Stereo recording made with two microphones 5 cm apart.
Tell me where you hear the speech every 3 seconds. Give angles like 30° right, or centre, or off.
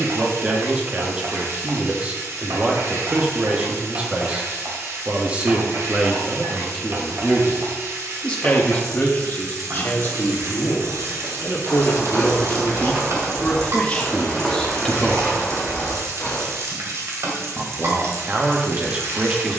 20° right, 20° right, 10° left, 40° left, 30° left, 10° right, 20° right.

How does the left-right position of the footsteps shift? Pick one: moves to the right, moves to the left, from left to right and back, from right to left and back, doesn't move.
moves to the left.